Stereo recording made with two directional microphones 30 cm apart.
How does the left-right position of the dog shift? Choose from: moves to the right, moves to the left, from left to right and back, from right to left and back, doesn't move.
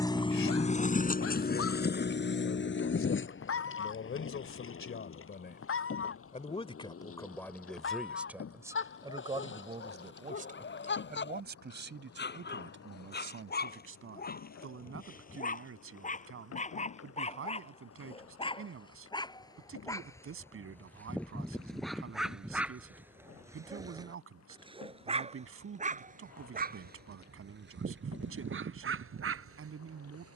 moves to the right.